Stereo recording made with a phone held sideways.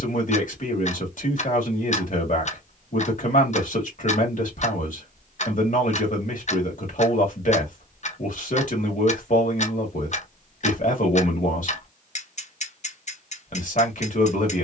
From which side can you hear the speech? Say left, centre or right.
left.